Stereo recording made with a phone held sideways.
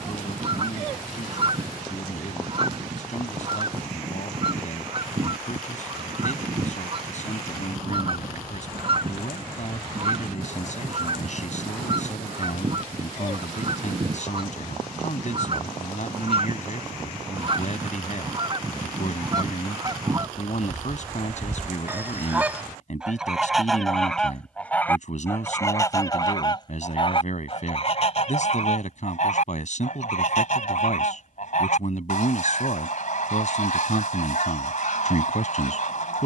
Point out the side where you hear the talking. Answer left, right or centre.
left.